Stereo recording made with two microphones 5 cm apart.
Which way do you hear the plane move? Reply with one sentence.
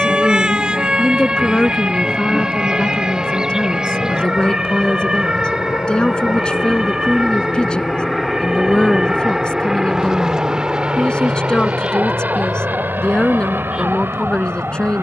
In this clip you hear the plane move to the right.